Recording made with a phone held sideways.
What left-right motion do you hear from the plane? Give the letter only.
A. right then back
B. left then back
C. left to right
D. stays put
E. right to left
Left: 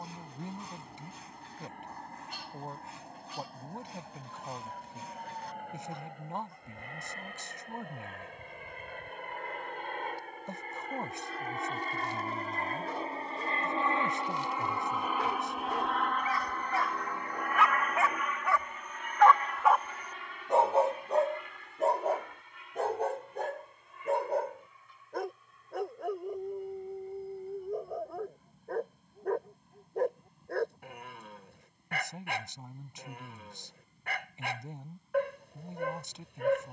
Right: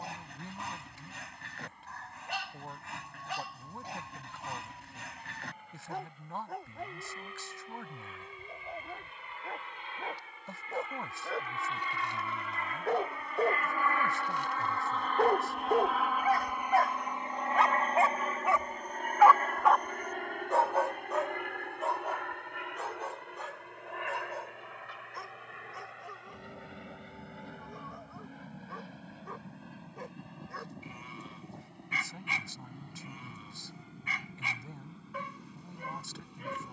C.